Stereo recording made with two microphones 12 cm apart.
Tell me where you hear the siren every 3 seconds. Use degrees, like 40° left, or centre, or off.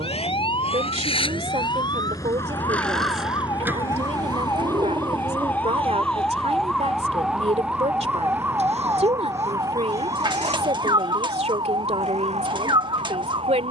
40° left, 20° left, centre, 30° right, 50° right.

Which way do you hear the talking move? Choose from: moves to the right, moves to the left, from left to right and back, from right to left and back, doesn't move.
doesn't move.